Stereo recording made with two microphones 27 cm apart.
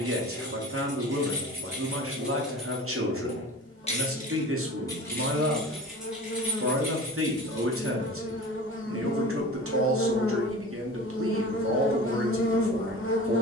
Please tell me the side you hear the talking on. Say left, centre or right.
right.